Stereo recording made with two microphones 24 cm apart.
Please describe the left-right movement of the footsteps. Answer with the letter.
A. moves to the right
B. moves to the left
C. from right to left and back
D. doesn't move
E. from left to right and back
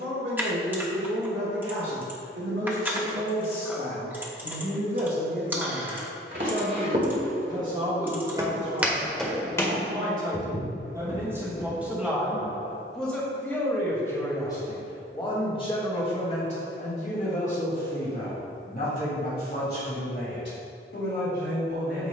B.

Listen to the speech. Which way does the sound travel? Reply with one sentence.
You can hear the speech travel towards the left.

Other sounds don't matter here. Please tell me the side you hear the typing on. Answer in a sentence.
You can hear the typing in the centre.